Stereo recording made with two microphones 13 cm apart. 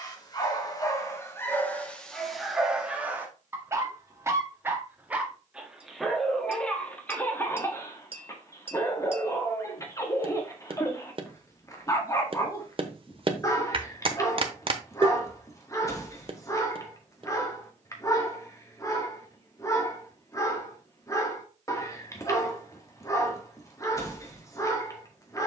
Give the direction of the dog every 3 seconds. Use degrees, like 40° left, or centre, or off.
10° left, 10° right, 10° left, 20° left, 20° left, 20° left, 20° left, 20° left, 20° left.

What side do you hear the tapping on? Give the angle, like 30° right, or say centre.
40° right.